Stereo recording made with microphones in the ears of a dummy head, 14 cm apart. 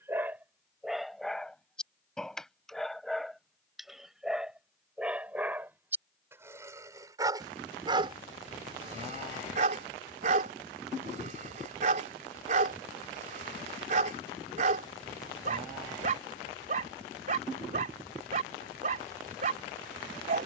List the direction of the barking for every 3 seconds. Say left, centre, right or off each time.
centre, centre, right, right, right, right, right.